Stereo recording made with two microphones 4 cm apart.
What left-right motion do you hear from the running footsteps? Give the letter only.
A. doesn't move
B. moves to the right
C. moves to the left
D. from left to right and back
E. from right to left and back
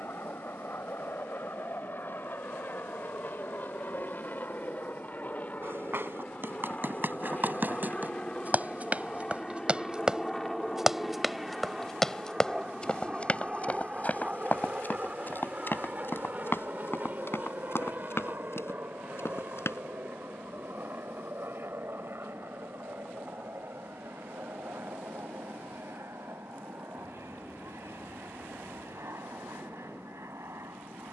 C.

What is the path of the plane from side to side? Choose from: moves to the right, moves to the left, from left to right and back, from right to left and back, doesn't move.
moves to the right.